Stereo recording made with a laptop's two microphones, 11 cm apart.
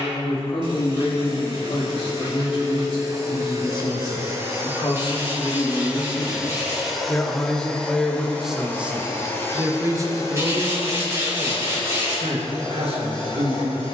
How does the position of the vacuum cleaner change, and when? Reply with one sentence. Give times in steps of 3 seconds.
In this clip you hear the vacuum cleaner on the right from 0 s, in the centre from 6 s and on the left from 9 s.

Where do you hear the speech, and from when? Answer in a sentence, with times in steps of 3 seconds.
You can hear the speech on the left from 0 s, in the centre from 6 s and on the right from 9 s.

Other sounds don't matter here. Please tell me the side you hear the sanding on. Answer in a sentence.
In this clip you hear the sanding on the right.